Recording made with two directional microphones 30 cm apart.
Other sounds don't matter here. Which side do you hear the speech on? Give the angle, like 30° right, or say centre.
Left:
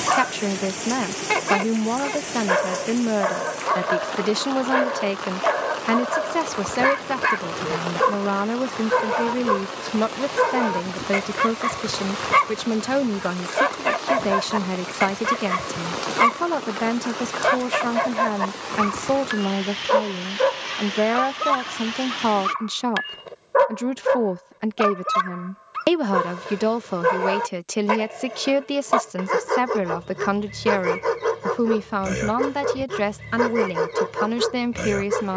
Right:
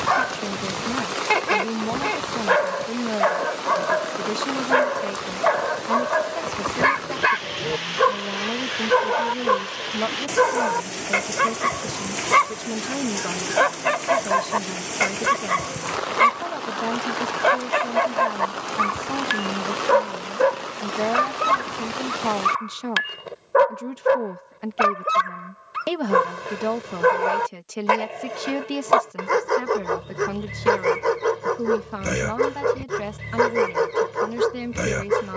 60° left.